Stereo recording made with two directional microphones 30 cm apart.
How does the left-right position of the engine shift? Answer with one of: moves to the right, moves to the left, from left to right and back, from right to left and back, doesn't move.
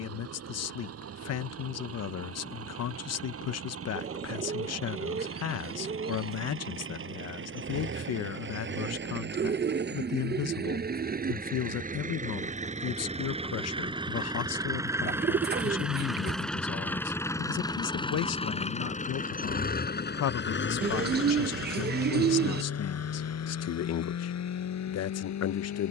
moves to the left.